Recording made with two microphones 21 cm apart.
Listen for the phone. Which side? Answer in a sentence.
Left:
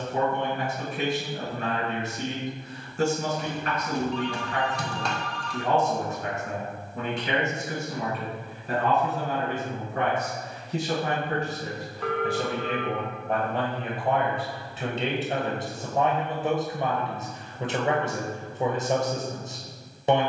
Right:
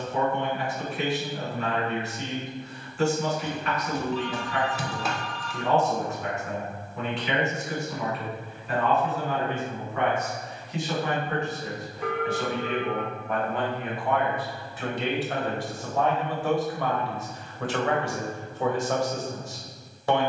In this clip you hear the phone in the centre.